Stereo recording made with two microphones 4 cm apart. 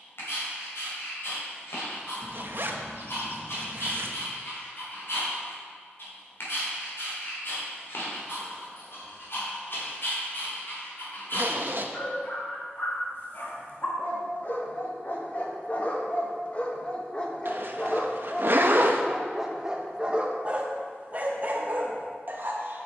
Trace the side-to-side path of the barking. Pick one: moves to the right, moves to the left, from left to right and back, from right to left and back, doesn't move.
moves to the right.